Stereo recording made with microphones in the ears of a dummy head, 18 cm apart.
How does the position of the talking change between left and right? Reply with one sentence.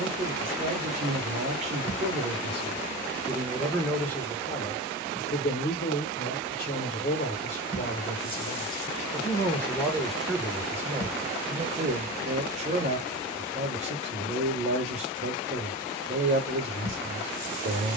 You can hear the talking go left and come back.